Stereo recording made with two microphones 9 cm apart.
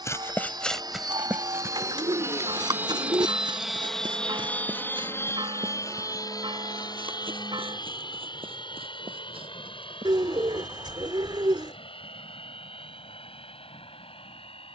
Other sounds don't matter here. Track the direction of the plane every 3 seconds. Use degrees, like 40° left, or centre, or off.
40° right, 10° left, 50° left, 60° left, 70° left.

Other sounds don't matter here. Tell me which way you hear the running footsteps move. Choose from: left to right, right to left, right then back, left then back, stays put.
left to right.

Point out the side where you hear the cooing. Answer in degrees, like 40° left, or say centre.
60° right.